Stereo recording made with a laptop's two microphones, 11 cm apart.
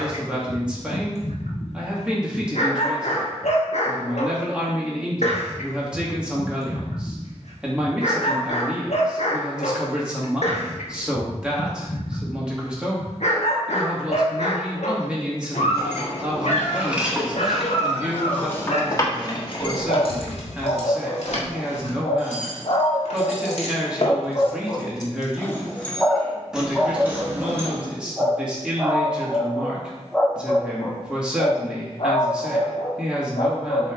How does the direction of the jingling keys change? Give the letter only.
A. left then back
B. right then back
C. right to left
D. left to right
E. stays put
A.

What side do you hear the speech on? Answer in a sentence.
In this clip you hear the speech in the centre.